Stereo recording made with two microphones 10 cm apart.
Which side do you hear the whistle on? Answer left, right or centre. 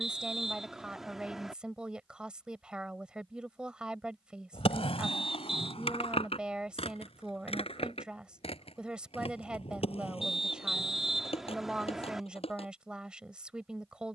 centre.